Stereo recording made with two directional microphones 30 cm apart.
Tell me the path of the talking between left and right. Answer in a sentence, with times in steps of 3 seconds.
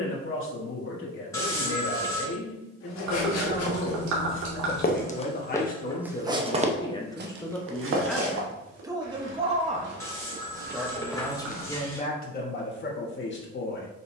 You can hear the talking on the left from 0 s, in the centre from 6 s and on the left from 12 s.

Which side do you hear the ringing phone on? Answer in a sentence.
You can hear the ringing phone in the centre.